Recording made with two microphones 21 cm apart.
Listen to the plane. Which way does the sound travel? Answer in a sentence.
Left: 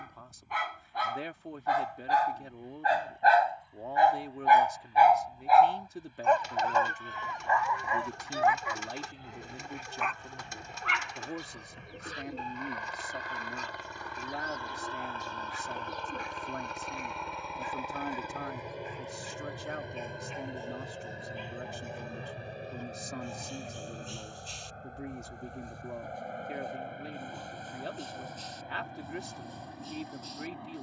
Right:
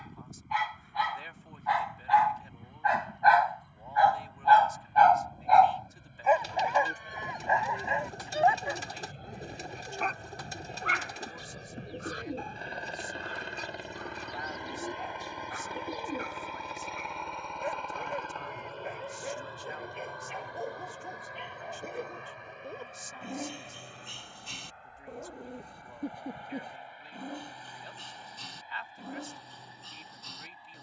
You can hear the plane go from the right side to the left.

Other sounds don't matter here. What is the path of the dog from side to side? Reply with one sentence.
In this clip you hear the dog move to the right.